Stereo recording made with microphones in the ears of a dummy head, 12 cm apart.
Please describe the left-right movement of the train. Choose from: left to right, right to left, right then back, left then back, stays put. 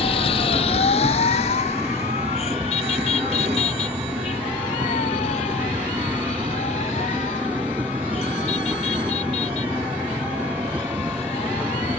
stays put.